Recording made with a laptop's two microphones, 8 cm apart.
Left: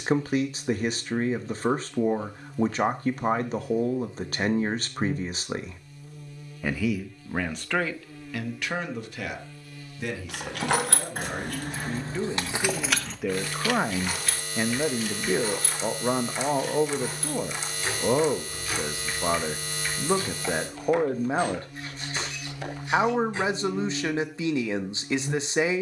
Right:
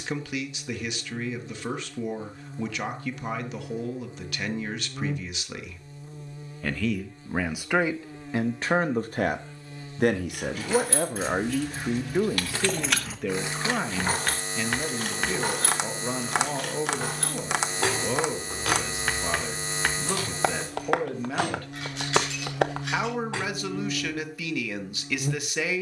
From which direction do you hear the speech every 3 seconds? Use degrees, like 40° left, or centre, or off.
30° left, 30° left, 10° right, 40° right, centre, 30° left, 30° left, 30° left, 30° left.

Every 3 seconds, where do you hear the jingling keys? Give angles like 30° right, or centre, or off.
off, off, off, 50° left, 10° right, 60° right, 70° right, 80° right, off.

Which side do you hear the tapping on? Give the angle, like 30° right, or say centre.
60° right.